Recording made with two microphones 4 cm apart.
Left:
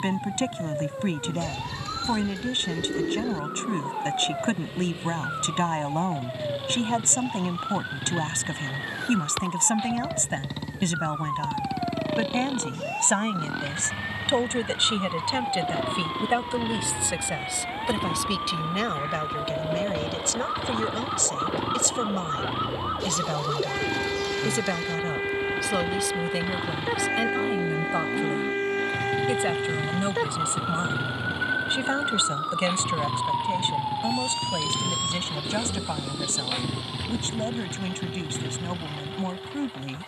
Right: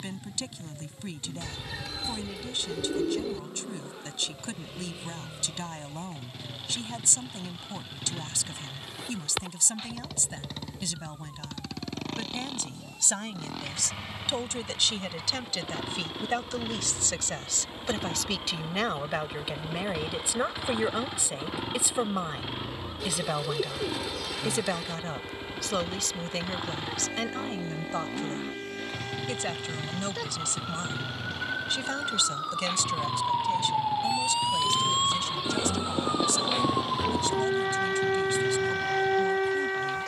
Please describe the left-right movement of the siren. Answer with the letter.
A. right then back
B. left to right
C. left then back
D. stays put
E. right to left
B.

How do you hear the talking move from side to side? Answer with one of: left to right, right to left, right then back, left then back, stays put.
right then back.